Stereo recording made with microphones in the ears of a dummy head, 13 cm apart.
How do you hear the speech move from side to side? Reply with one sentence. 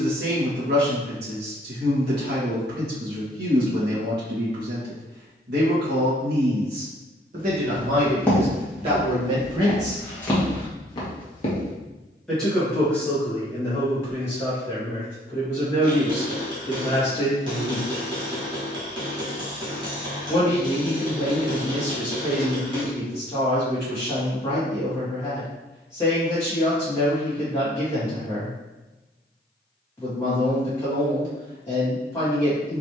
You can hear the speech travel towards the left.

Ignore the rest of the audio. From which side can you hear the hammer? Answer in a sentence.
You can hear the hammer on the right.